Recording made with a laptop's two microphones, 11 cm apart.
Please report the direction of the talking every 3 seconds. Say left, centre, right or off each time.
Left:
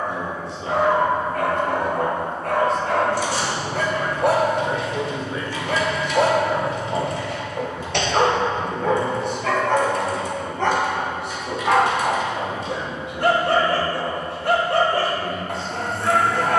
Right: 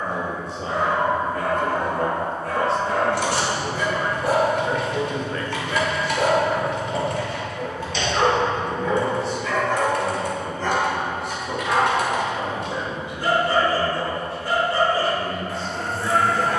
right, centre, left, left, left, left.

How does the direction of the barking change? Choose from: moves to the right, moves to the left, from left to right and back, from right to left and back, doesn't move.
doesn't move.